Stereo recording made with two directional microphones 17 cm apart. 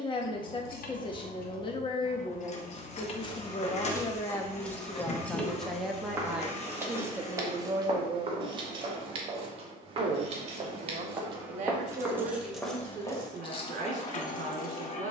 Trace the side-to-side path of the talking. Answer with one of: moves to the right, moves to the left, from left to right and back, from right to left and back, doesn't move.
moves to the right.